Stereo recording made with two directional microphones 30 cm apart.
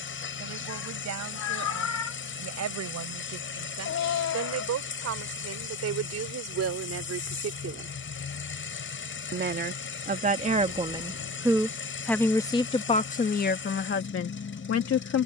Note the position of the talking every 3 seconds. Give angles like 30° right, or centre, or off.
60° right, 60° right, 50° right, 20° right, 30° left.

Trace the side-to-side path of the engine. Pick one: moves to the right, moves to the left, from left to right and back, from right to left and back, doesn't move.
doesn't move.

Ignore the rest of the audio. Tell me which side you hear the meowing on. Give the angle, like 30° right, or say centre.
60° left.